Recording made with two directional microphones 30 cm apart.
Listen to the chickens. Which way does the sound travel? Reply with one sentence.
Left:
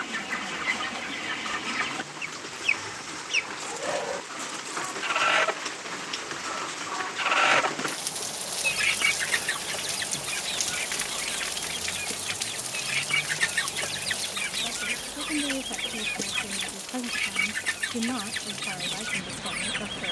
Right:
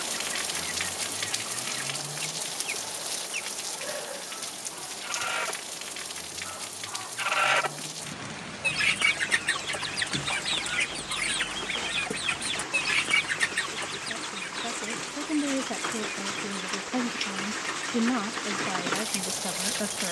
In this clip you hear the chickens move from left to right and back again.